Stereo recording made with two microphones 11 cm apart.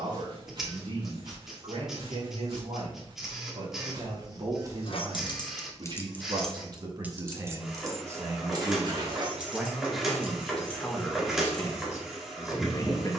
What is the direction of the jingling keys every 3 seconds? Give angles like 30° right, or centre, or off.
off, 40° left, 20° right, 50° right, off.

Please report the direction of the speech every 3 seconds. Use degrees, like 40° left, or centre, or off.
60° right, 50° right, 30° right, 10° left, 30° left.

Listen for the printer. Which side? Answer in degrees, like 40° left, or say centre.
centre.